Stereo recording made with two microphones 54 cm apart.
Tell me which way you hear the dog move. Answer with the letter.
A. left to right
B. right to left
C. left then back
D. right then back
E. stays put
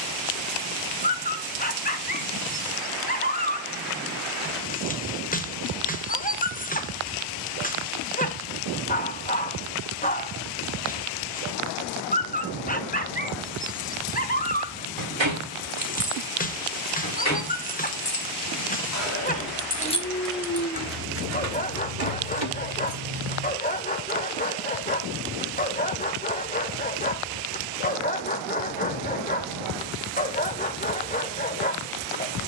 E.